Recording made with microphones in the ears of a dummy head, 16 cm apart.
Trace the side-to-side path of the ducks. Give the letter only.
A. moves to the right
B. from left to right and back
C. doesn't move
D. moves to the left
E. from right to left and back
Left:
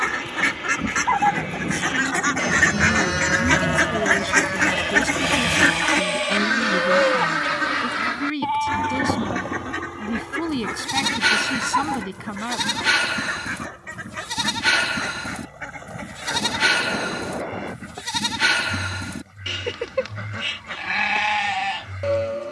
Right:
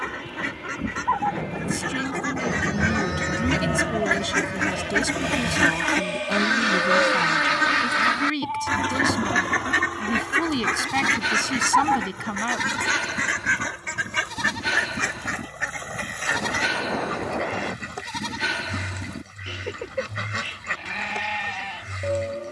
A.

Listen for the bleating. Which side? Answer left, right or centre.
left.